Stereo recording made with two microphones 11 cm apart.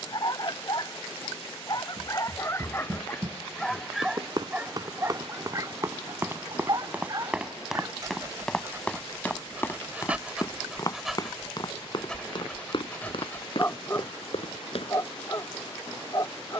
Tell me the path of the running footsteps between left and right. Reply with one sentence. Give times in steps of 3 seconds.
You can hear the running footsteps on the right from 0 s, in the centre from 6 s, on the left from 9 s and not at all from 15 s.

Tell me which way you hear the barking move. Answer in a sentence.
You can hear the barking move from left to right and back again.